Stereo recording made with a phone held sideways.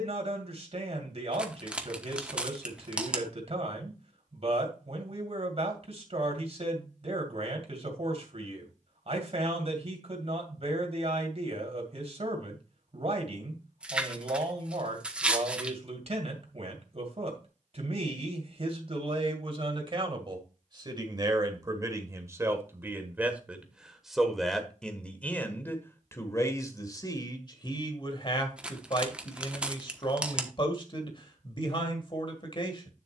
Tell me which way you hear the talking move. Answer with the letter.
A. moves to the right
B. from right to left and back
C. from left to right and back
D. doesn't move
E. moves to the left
E.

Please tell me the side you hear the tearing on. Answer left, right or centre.
centre.